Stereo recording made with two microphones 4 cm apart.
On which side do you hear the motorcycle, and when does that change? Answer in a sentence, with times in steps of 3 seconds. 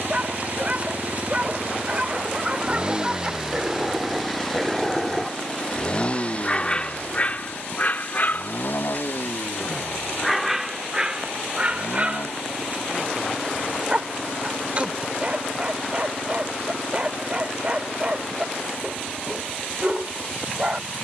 In this clip you hear the motorcycle on the right from 0 s, in the centre from 3 s and on the left from 6 s.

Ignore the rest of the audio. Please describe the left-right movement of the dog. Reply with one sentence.
In this clip you hear the dog go left and come back.